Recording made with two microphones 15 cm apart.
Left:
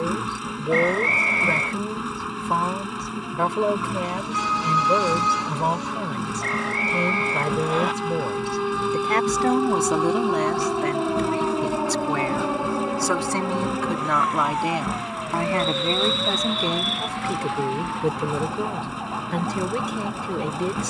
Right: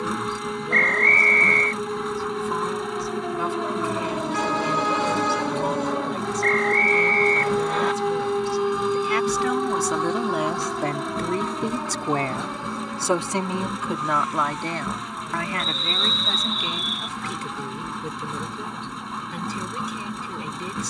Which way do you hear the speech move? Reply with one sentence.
In this clip you hear the speech move from left to right and back again.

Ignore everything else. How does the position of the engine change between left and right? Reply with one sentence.
In this clip you hear the engine stay in one place.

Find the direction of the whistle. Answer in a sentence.
In this clip you hear the whistle in the centre.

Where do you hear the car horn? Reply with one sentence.
You can hear the car horn on the right.